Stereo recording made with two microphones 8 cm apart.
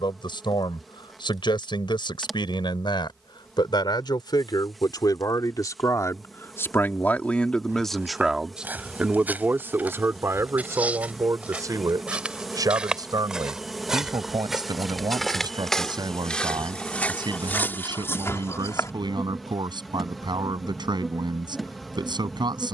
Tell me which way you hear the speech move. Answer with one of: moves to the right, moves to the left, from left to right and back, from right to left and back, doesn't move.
moves to the right.